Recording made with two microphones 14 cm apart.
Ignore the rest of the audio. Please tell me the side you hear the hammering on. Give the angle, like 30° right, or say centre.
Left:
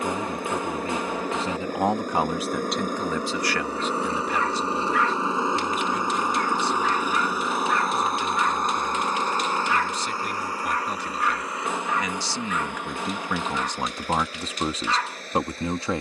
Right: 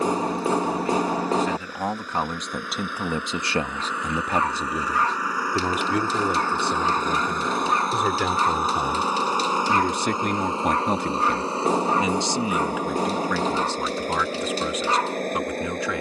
40° right.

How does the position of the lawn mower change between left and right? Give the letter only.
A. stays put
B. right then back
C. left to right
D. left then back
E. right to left
C.